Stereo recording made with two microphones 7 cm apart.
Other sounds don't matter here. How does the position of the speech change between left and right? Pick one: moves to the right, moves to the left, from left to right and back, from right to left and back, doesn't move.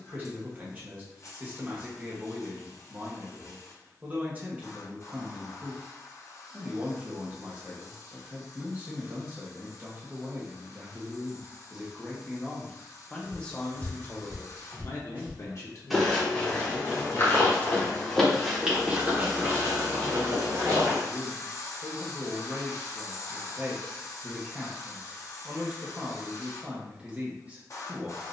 from right to left and back.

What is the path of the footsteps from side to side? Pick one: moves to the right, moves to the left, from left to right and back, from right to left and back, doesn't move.
from right to left and back.